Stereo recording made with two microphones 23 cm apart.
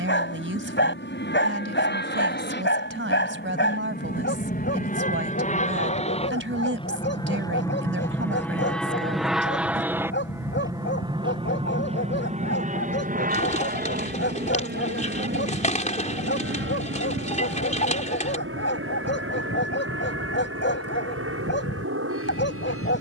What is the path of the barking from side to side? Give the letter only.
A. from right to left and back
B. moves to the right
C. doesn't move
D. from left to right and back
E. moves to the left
C.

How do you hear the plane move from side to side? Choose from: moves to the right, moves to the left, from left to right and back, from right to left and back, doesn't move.
moves to the right.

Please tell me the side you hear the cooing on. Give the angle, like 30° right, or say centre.
30° left.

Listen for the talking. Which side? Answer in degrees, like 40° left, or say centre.
60° right.